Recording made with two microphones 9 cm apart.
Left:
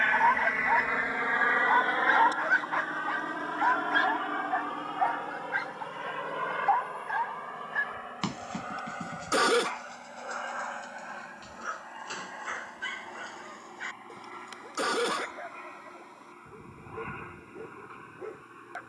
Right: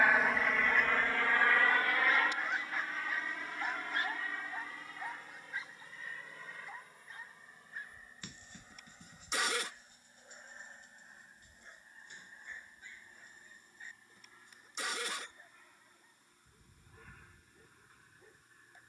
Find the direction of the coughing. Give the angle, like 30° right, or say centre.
60° left.